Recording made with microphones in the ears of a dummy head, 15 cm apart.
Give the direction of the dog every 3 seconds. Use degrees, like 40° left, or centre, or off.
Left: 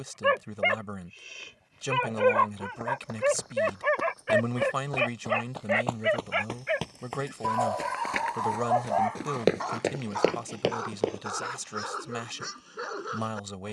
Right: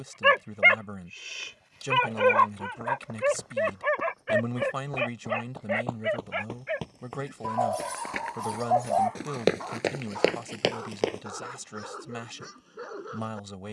30° right, centre, 30° left, 40° left, 40° left.